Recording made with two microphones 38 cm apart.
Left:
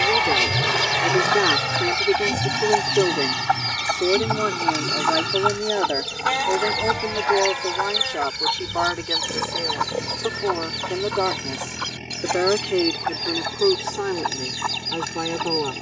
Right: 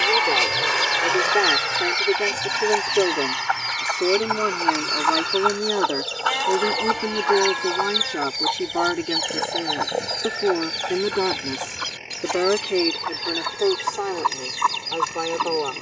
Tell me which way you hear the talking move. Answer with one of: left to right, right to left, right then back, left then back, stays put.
right then back.